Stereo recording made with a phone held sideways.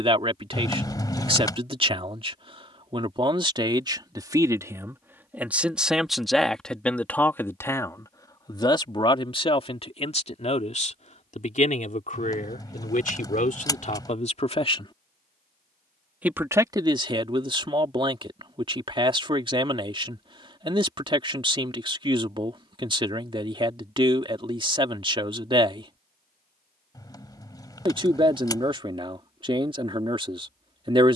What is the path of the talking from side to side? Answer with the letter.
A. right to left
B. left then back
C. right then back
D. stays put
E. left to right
B.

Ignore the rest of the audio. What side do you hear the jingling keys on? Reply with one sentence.
In this clip you hear the jingling keys on the left.